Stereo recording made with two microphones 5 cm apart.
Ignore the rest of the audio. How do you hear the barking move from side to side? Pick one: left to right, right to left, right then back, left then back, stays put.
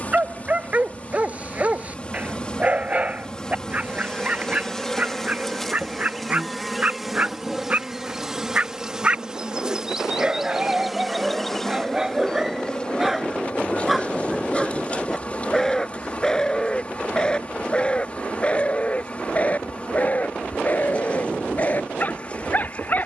right to left.